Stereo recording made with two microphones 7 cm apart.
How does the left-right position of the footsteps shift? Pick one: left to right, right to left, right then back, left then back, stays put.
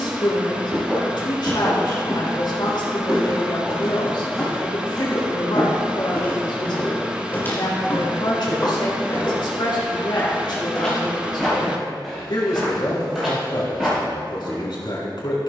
left then back.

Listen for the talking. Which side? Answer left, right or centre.
left.